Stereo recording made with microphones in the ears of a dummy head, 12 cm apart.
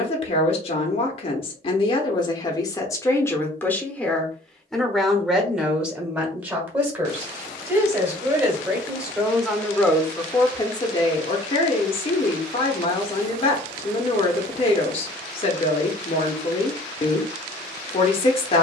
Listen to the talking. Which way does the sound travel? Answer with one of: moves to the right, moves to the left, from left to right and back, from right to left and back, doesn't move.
from left to right and back.